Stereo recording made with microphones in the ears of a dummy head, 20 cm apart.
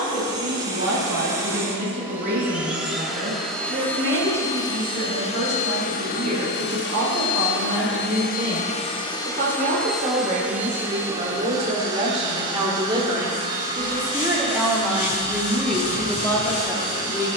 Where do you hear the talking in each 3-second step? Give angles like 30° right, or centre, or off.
50° right, 50° right, 50° right, 30° right, 20° right, 10° left.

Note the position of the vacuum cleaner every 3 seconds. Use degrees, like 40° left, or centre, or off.
10° right, 20° left, 50° left, centre, 20° right, 20° right.